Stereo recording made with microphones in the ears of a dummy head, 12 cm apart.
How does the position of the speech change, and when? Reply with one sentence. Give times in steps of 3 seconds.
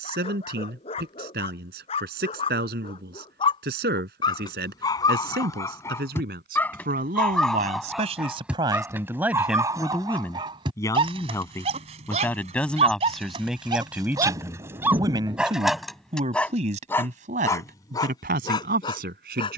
You can hear the speech on the right from 0 s, in the centre from 9 s and on the right from 15 s.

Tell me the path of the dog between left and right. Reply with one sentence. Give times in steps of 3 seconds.
In this clip you hear the dog on the left from 0 s, in the centre from 6 s, on the right from 9 s, in the centre from 15 s and on the left from 18 s.